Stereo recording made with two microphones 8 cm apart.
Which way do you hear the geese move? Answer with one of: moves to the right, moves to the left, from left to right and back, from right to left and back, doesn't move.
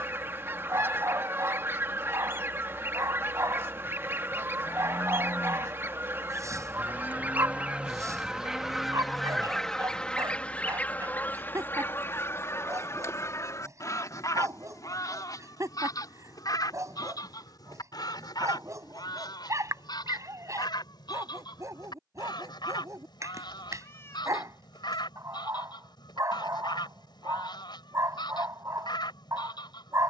moves to the left.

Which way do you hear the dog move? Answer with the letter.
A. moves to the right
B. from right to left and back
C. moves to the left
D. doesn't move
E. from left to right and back
D.